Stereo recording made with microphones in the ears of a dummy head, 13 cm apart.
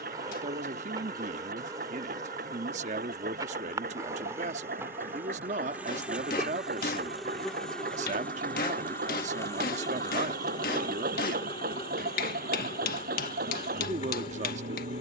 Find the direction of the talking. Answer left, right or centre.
right.